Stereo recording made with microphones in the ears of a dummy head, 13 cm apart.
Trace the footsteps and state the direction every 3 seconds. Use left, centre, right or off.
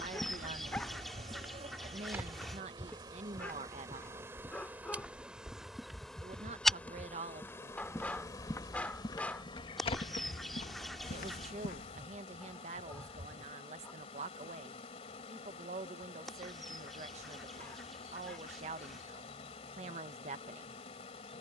centre, centre, centre, left, off, off, off.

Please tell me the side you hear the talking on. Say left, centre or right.
right.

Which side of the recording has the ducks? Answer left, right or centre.
centre.